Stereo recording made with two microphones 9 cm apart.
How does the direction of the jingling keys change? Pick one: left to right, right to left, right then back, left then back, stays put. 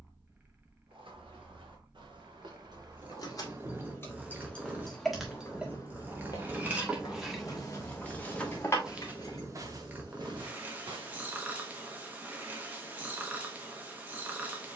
right then back.